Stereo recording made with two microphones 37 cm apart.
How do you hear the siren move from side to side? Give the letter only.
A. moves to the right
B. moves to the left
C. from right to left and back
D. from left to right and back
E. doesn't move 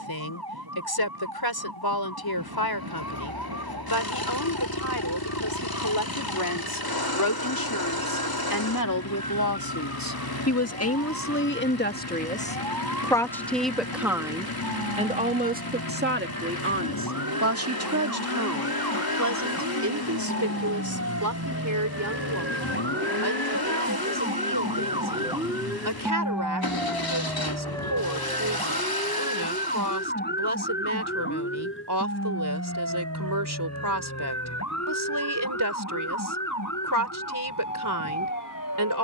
B.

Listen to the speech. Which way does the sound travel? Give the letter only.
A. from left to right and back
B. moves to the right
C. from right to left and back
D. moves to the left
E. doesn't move
B.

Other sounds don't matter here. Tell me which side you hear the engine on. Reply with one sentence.
In this clip you hear the engine on the left.